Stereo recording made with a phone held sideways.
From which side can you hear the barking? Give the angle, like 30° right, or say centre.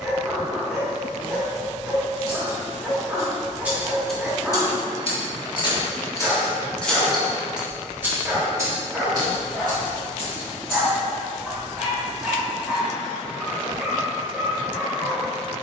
centre.